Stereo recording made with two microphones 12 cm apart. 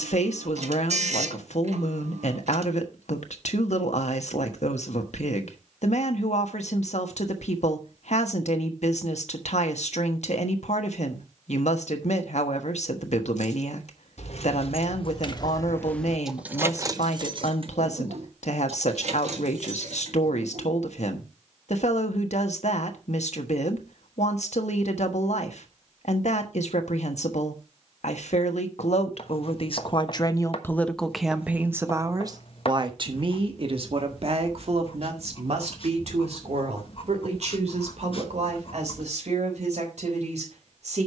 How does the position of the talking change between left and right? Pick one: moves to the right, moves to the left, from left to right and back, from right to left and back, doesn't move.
moves to the right.